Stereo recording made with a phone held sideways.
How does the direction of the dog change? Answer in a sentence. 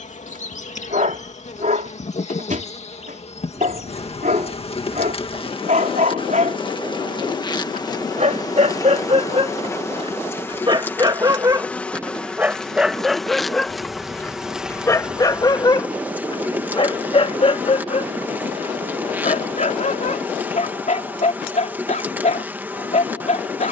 You can hear the dog travel towards the left.